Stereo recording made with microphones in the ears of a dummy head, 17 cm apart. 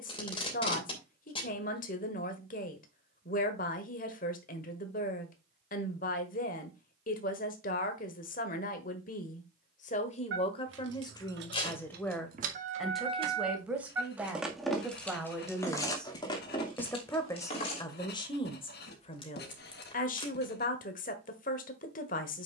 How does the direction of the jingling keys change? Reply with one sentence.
In this clip you hear the jingling keys move to the left.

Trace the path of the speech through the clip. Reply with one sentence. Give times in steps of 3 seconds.
In this clip you hear the speech on the left from 0 s, in the centre from 12 s and on the left from 18 s.